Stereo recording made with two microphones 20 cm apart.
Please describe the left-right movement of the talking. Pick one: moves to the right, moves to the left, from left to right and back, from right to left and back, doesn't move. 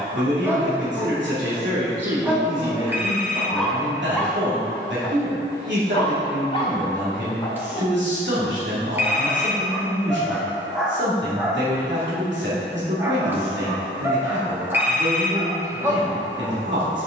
doesn't move.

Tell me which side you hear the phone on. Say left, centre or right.
centre.